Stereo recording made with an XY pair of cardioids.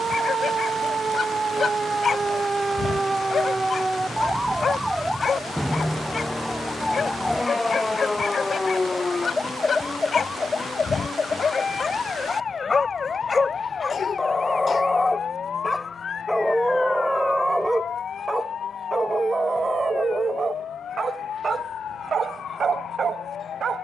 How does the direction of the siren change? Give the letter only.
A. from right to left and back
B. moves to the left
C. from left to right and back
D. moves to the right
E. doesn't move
B.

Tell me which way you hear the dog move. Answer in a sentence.
You can hear the dog travel towards the right.